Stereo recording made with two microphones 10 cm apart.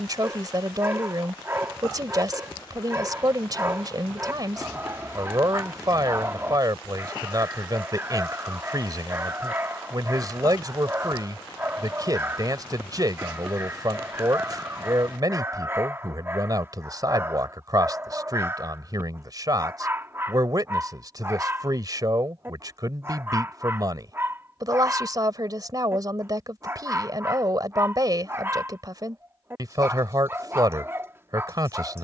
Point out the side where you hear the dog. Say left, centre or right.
right.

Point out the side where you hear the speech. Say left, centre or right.
right.